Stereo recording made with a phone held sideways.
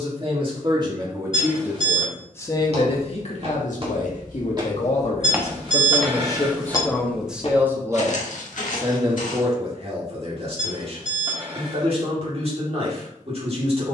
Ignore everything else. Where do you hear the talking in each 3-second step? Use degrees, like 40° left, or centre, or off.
10° right, 50° left, centre, 40° right, 40° right.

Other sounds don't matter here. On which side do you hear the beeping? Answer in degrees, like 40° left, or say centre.
40° right.